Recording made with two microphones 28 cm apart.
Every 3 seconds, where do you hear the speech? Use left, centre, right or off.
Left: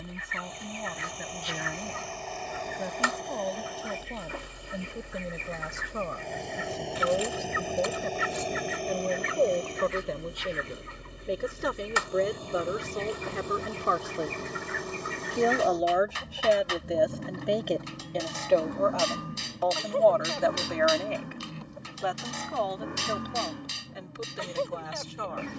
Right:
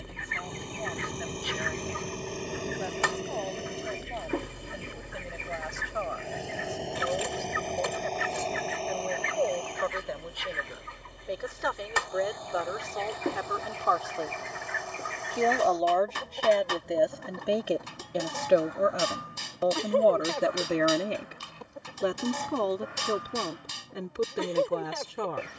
left, left, left, left, left, centre, right, right, right.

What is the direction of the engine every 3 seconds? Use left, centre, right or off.
right, right, centre, left, left, left, left, left, left.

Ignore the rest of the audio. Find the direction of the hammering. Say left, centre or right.
right.